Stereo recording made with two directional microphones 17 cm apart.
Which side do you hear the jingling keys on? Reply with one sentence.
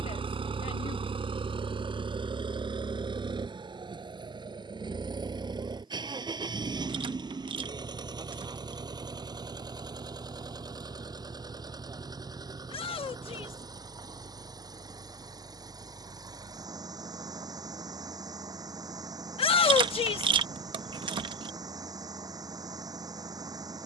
In this clip you hear the jingling keys on the right.